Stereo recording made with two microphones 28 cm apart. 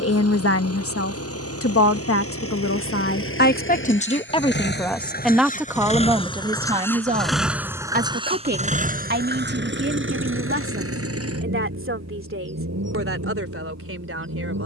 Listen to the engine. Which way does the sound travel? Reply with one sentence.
You can hear the engine move from left to right.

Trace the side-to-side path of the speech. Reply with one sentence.
In this clip you hear the speech move from left to right.